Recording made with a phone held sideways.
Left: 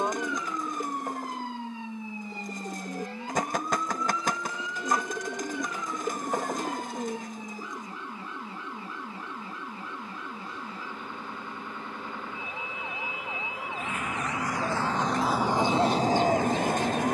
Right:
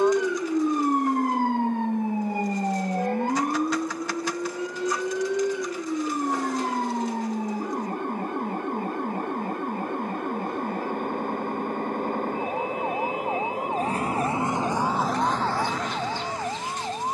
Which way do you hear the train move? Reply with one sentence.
In this clip you hear the train move from right to left.